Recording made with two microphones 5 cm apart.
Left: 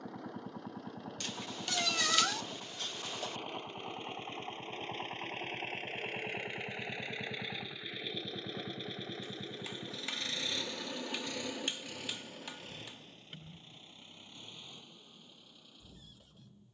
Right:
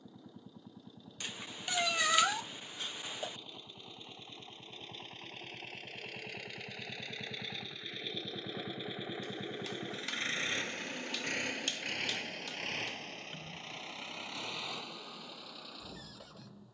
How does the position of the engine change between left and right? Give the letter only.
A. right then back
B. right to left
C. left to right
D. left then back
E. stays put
C.